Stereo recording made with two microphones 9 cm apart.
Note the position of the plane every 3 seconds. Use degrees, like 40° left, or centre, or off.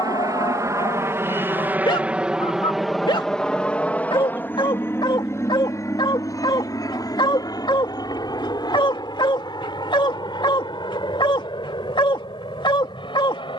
20° right, 20° left, 40° left, 50° left, 50° left.